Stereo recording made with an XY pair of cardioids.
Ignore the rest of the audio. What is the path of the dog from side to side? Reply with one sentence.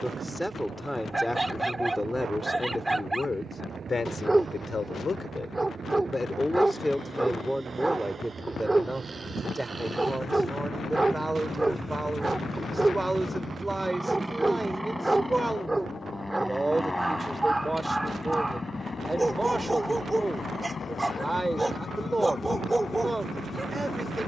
You can hear the dog stay in one place.